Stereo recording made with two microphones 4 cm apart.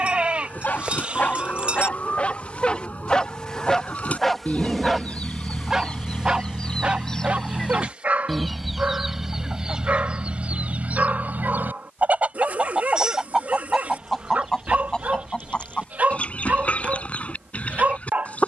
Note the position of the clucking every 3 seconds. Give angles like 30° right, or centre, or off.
30° left, 30° left, 10° left, 30° right, 10° right, 30° left.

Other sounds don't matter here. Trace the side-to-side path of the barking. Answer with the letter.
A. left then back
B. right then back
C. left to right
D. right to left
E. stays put
C.